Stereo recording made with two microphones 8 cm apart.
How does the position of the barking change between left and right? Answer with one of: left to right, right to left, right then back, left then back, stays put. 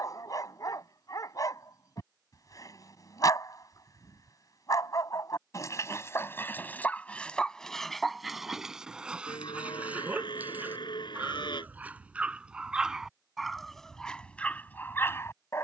right then back.